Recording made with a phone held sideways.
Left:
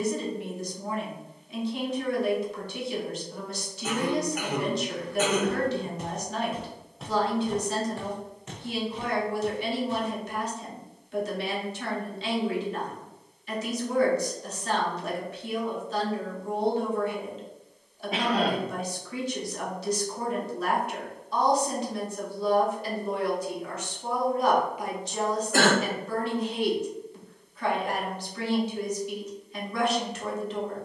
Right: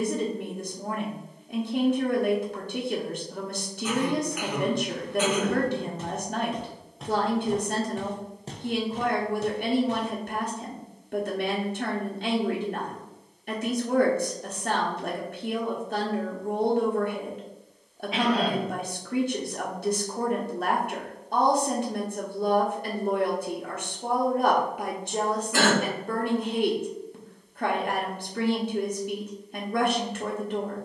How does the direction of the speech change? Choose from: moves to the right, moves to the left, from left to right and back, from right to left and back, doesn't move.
doesn't move.